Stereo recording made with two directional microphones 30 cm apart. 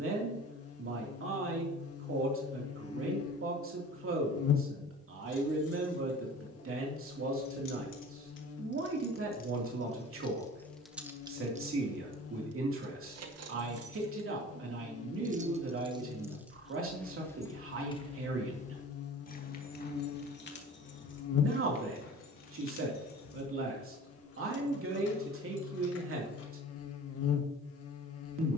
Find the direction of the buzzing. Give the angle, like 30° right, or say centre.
50° left.